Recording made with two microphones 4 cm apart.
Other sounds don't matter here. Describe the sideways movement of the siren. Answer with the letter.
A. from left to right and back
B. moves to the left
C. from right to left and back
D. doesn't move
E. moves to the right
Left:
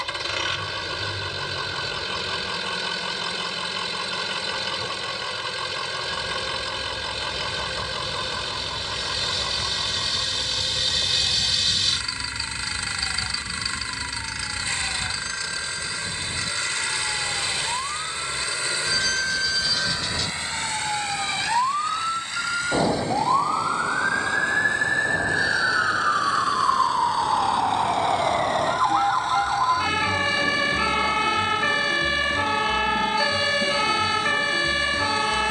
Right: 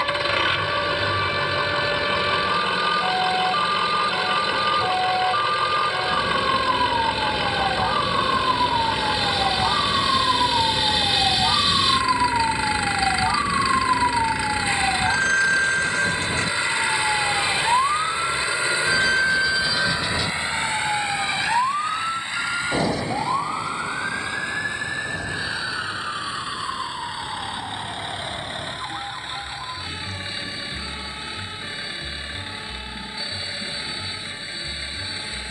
B.